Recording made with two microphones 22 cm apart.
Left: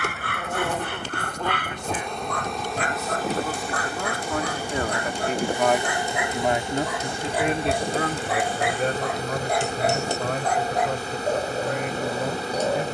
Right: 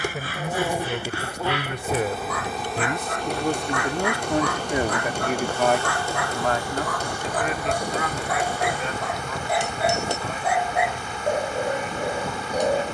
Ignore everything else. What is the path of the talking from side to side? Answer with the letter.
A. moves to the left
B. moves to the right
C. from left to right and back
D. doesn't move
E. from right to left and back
A.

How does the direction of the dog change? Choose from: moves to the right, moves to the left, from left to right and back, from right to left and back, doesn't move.
moves to the right.